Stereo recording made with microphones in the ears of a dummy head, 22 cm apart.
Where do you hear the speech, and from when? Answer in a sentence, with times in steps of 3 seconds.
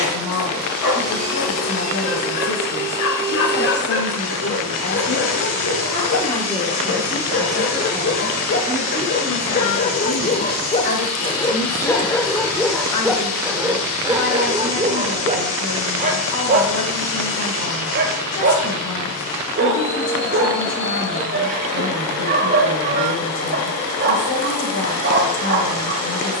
You can hear the speech on the left from 0 s, in the centre from 6 s and on the left from 9 s.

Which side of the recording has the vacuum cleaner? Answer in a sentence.
You can hear the vacuum cleaner on the left.